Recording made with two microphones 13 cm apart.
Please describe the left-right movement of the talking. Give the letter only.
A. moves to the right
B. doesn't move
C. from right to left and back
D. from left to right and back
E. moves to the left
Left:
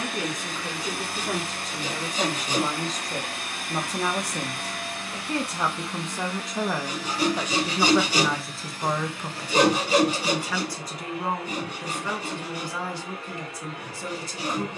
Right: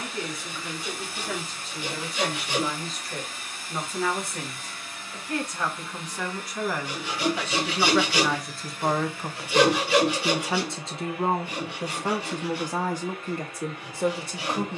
A.